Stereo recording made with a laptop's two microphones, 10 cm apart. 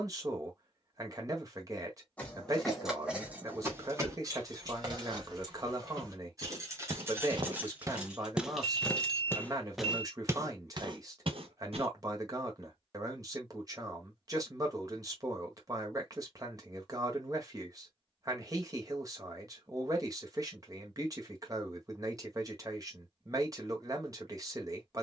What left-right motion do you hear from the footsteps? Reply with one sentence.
In this clip you hear the footsteps go left and come back.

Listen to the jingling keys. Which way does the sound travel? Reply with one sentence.
You can hear the jingling keys move from left to right and back again.